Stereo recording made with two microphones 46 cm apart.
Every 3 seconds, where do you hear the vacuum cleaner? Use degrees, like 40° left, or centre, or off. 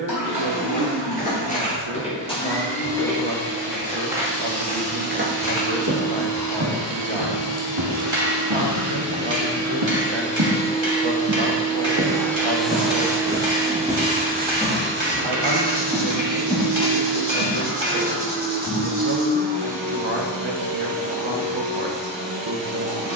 60° left, 50° left, 40° left, 20° left, 10° right, 40° right, 50° right, 60° right.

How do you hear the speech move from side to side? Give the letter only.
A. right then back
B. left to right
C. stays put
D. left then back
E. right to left
C.